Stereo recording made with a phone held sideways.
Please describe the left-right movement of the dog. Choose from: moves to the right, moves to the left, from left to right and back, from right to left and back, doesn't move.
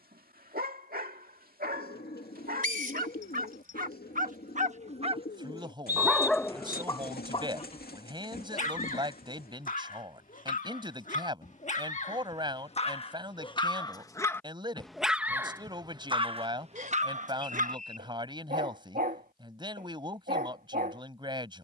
from right to left and back.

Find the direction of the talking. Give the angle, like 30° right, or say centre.
30° right.